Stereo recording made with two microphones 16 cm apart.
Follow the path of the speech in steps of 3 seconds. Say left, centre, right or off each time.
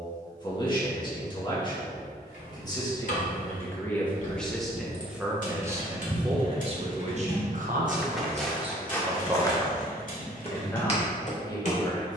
left, centre, right, centre.